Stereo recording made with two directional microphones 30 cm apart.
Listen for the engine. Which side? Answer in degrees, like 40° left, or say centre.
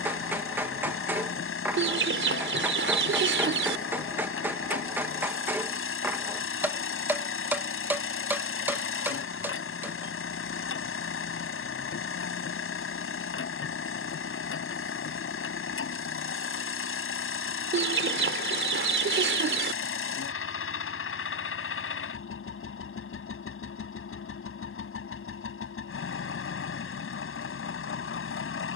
40° left.